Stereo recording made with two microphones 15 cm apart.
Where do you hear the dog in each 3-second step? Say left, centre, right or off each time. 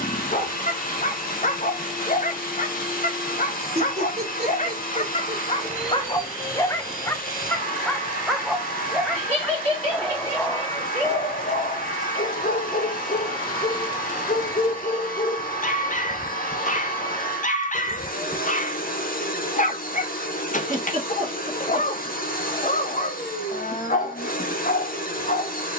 left, left, centre, left, left, left, left, left, left.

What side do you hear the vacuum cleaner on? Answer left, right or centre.
left.